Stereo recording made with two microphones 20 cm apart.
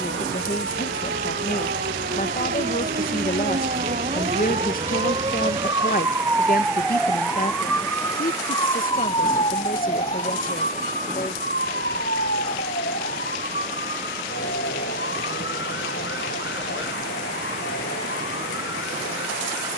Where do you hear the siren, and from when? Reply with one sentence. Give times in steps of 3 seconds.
In this clip you hear the siren on the right from 0 s, in the centre from 6 s and on the left from 9 s.